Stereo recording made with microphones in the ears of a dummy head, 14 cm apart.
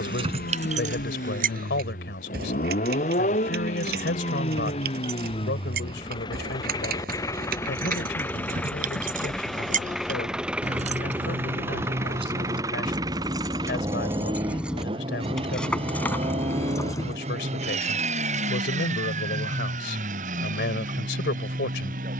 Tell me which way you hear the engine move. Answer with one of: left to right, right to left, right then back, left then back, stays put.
left to right.